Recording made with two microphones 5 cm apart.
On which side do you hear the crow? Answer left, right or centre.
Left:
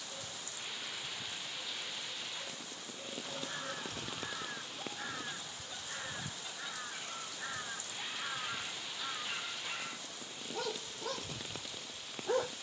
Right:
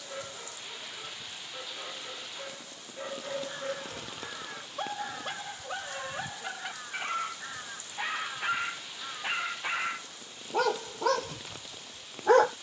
centre.